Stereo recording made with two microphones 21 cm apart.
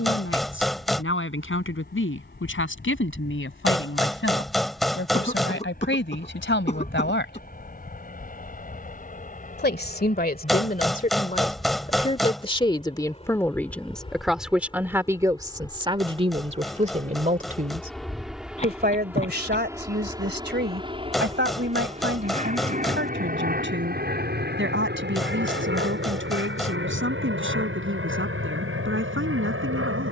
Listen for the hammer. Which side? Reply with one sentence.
You can hear the hammer in the centre.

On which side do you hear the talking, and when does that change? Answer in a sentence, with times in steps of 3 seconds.
In this clip you hear the talking on the left from 0 s, in the centre from 12 s and on the right from 15 s.